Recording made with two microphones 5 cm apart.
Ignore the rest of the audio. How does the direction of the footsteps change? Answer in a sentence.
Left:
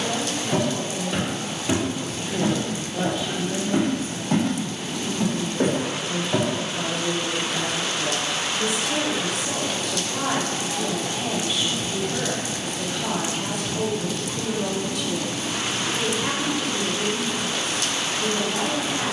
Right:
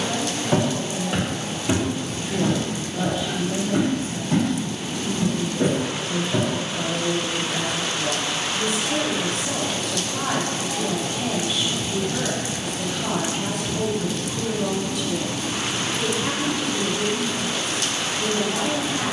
In this clip you hear the footsteps move from right to left.